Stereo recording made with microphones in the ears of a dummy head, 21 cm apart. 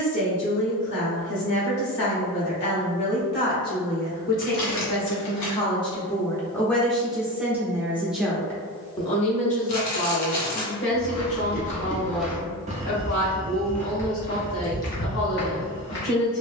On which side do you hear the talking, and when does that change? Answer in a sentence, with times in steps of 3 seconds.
You can hear the talking on the left from 0 s, in the centre from 6 s and on the left from 9 s.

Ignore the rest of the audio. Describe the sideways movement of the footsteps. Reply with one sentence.
In this clip you hear the footsteps go right and come back.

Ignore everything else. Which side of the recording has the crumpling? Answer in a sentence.
In this clip you hear the crumpling on the left.